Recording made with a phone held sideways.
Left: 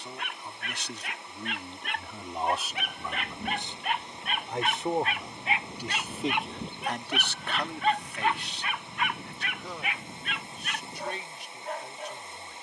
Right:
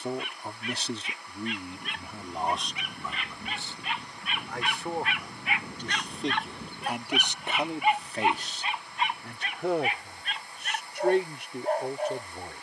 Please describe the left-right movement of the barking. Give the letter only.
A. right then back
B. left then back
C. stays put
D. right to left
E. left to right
E.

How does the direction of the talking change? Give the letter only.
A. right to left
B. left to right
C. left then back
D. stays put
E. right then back
C.